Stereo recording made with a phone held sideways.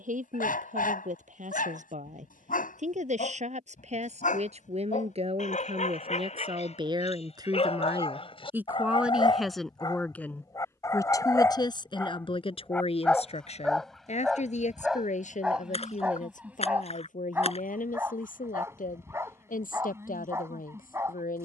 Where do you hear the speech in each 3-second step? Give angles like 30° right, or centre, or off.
60° right, 50° right, 30° right, 10° left, 50° left, 60° left, 70° left.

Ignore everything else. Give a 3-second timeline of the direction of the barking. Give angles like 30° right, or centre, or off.
70° left, 60° left, 40° left, 20° left, centre, 10° right, 20° right.